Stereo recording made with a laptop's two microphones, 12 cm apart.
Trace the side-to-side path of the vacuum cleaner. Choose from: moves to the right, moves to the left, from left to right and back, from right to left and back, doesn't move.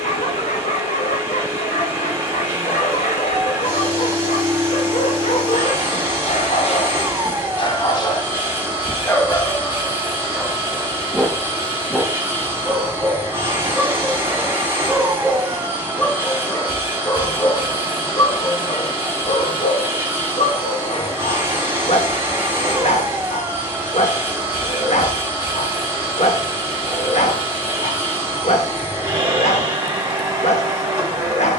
doesn't move.